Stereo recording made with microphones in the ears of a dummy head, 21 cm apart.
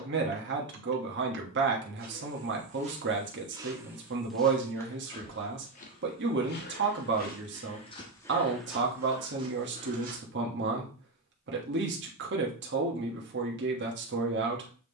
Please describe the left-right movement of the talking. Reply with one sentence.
You can hear the talking stay in one place.